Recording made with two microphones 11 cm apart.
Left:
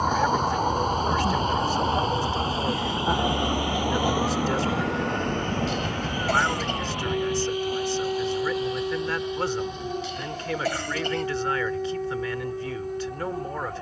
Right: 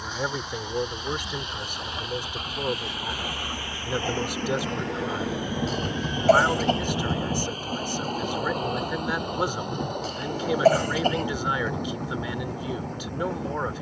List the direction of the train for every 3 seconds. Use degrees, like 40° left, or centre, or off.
40° left, 10° left, 40° right, 60° right, 70° right.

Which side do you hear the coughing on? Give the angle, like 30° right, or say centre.
40° right.